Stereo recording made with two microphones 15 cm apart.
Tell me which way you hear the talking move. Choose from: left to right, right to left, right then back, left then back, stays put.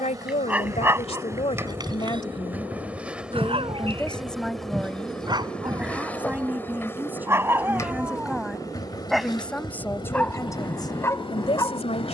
right then back.